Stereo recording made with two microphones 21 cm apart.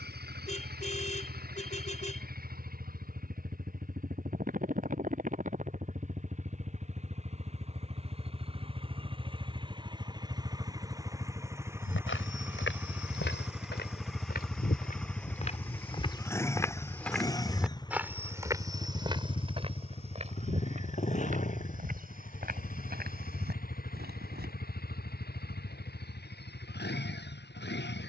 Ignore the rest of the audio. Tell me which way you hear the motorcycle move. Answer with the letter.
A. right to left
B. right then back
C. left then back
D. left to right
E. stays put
A.